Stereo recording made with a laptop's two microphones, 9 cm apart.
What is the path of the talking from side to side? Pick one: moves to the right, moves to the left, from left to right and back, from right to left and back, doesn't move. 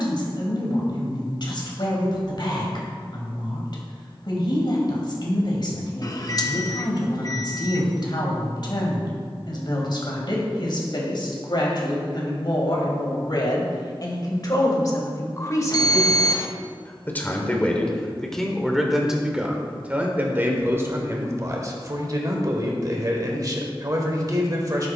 moves to the right.